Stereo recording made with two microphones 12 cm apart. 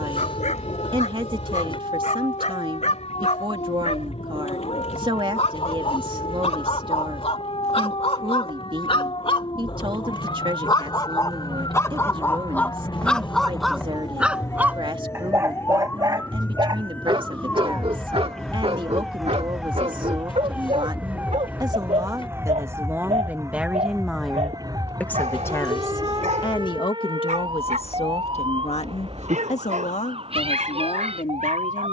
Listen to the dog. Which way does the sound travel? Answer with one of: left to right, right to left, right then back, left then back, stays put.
left to right.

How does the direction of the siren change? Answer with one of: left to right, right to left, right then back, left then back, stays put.
left to right.